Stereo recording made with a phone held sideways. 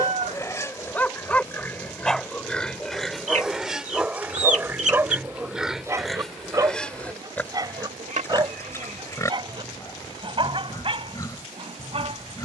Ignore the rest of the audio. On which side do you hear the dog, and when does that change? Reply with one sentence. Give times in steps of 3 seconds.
You can hear the dog in the centre from 0 s and on the right from 6 s.